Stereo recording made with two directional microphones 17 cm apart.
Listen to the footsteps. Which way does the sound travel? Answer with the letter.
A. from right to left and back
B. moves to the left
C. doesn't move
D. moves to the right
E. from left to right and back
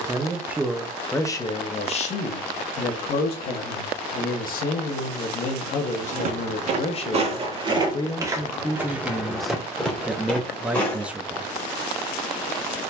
B.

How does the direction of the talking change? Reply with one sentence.
In this clip you hear the talking move from right to left and back again.